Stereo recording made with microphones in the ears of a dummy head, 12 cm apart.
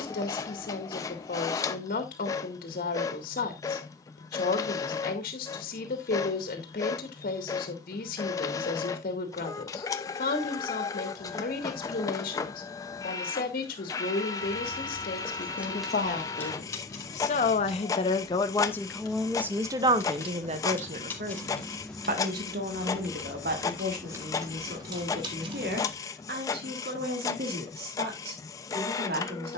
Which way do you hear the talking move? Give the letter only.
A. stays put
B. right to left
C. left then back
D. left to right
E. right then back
D.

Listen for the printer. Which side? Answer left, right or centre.
left.